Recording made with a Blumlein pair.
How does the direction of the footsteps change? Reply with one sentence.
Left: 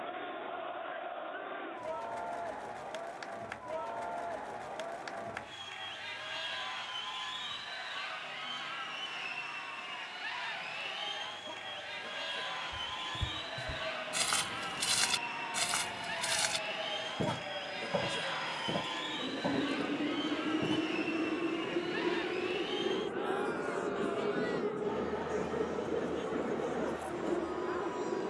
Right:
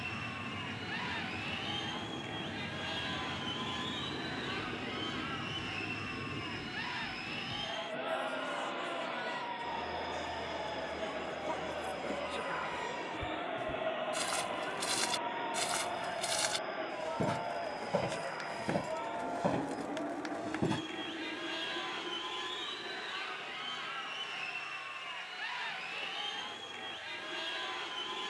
You can hear the footsteps go from the left side to the right.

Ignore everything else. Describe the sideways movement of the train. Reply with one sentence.
You can hear the train travel towards the left.